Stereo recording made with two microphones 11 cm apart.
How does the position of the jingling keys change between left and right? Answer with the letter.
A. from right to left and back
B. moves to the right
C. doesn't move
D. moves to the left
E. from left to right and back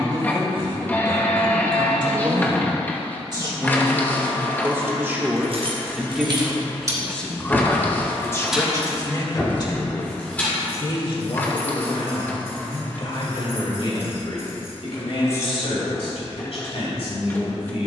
D.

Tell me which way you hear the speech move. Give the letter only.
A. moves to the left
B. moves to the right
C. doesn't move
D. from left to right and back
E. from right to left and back
A.